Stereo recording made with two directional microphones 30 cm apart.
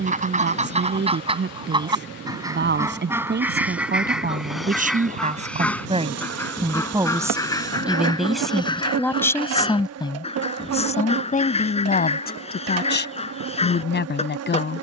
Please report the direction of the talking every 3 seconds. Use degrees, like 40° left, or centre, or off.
40° right, 30° right, 10° right, 20° left, 40° left.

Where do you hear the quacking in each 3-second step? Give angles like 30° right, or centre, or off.
20° right, centre, 10° left, 20° left, 20° left.